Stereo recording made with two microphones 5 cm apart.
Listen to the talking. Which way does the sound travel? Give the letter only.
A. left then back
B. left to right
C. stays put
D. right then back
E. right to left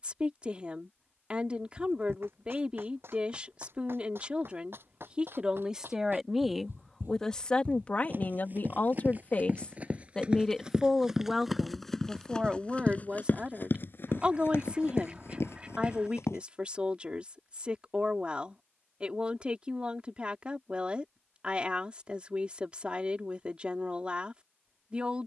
A.